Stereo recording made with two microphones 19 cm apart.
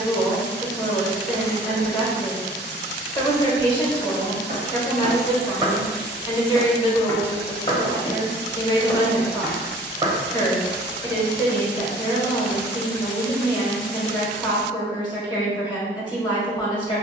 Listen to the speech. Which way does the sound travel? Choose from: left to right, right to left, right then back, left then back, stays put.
stays put.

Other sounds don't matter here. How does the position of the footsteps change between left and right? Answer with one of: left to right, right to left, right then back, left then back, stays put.
left then back.